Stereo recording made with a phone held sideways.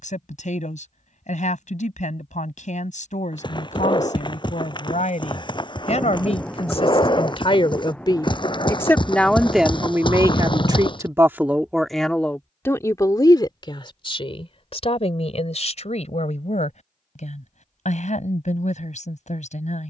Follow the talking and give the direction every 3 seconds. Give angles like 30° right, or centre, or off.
60° left, 60° left, 40° left, 10° right, 30° left, 50° left, 60° left.